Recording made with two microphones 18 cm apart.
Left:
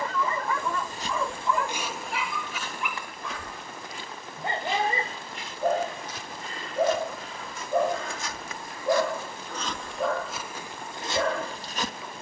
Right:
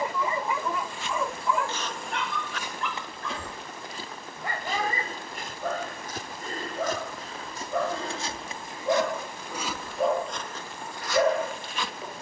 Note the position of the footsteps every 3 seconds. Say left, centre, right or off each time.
centre, right, right, centre.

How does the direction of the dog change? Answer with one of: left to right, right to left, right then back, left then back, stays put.
left then back.